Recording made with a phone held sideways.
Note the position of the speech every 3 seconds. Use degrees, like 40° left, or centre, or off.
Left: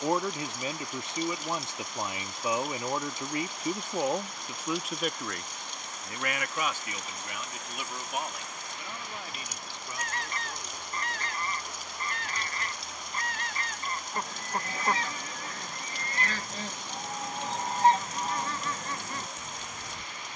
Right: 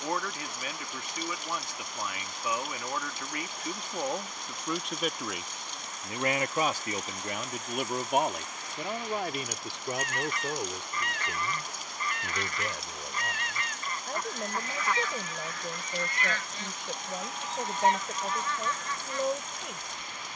30° left, 10° left, 40° right, 70° right, 80° right, 80° right, 80° right.